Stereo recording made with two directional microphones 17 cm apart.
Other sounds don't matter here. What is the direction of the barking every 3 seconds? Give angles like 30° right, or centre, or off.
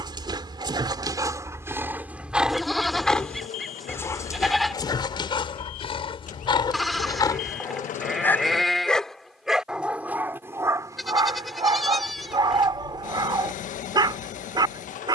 20° right, 20° left, 20° left, 20° right, 30° right.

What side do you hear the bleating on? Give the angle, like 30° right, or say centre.
centre.